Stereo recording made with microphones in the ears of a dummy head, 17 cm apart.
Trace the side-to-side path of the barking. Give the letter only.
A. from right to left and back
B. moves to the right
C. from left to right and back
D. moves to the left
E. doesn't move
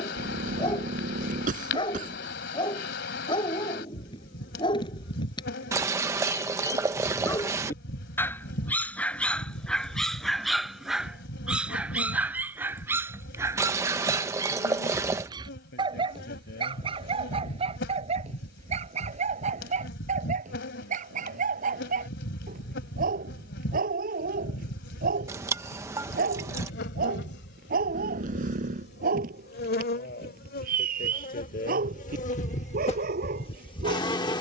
B.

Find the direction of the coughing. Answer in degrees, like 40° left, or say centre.
50° right.